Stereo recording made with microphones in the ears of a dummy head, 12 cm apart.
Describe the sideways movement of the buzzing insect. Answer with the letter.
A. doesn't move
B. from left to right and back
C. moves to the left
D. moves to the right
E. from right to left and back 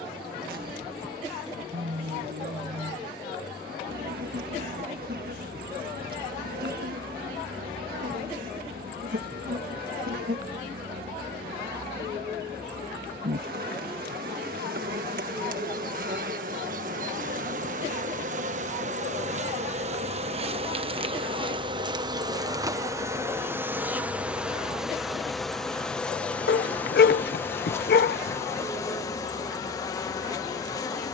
C.